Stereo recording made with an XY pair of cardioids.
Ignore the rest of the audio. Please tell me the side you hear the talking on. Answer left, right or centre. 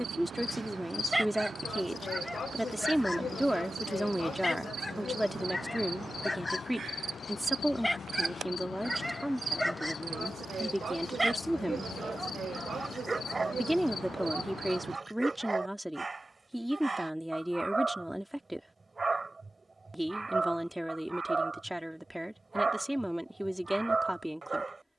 centre.